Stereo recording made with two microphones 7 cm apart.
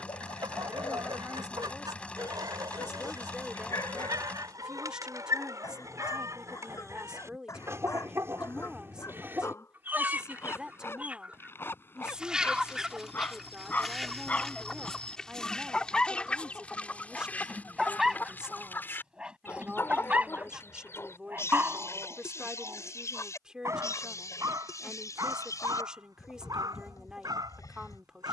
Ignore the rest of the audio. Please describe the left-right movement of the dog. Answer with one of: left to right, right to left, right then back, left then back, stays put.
left to right.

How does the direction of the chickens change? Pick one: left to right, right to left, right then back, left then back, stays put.
right to left.